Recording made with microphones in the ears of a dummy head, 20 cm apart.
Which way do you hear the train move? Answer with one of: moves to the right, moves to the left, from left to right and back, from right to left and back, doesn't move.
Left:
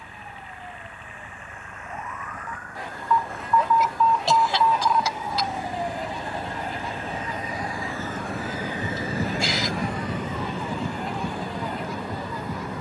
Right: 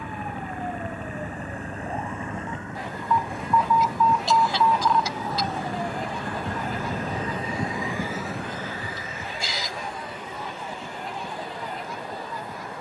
moves to the left.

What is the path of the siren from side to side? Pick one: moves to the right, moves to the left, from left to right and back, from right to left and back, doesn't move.
moves to the left.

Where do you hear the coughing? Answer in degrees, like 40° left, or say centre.
50° left.